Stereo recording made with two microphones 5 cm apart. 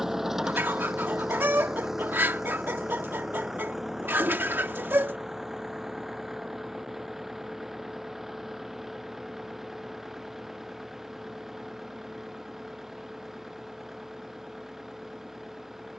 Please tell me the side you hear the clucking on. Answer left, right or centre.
right.